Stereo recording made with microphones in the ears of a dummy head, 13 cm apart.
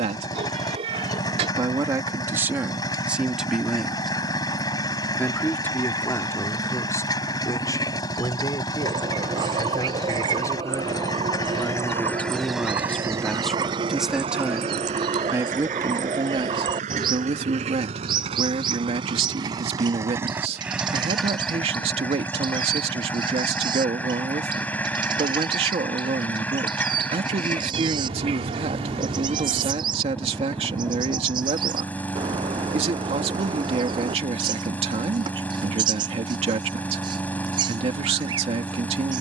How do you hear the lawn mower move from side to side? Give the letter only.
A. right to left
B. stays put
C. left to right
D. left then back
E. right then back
E.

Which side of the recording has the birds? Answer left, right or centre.
right.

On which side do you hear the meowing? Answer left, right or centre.
right.